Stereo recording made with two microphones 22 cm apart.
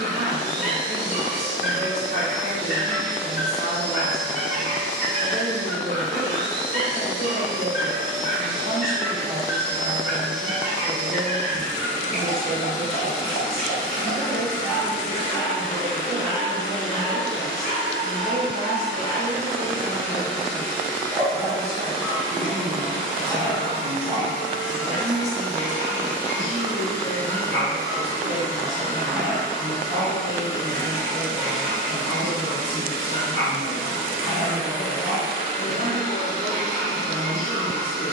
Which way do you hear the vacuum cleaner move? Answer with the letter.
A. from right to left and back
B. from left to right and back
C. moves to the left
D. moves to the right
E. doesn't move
C.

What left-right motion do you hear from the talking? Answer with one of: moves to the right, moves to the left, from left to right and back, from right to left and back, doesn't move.
moves to the left.